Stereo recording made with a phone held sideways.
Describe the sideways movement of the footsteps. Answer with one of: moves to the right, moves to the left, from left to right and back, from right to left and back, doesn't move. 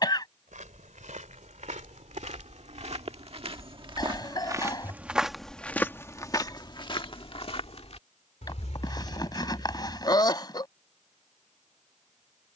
moves to the left.